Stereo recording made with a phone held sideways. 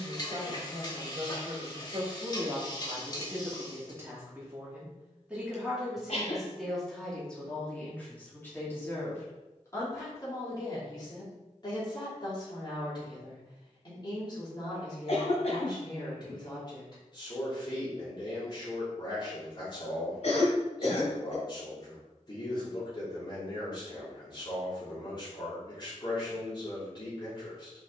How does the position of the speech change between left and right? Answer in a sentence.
You can hear the speech move from right to left.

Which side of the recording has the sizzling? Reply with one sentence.
You can hear the sizzling on the left.